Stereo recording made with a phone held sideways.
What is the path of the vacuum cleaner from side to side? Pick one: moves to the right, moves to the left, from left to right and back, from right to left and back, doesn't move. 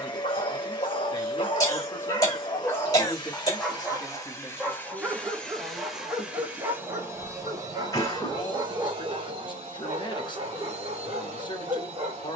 moves to the right.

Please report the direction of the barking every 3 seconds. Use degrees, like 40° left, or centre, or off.
30° left, centre, 30° right, 40° right.